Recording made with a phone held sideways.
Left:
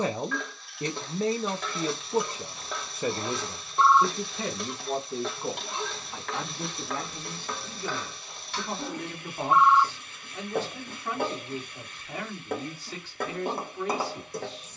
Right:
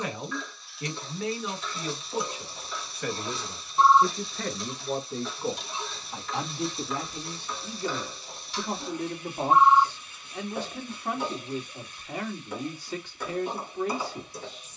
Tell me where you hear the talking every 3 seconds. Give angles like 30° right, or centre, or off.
40° left, 10° left, 10° right, 10° right, 10° right.